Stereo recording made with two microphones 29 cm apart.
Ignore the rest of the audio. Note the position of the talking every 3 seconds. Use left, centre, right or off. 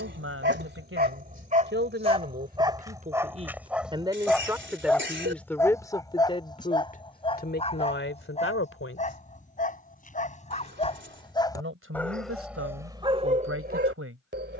right, centre, left, right, right.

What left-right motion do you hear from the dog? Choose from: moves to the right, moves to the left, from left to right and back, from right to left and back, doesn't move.
from right to left and back.